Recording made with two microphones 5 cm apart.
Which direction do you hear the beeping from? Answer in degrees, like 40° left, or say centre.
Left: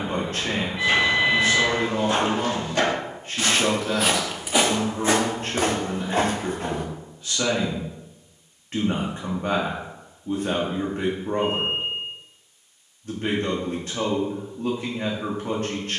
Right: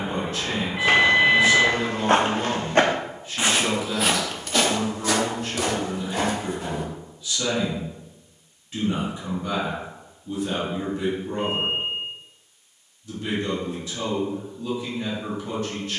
40° right.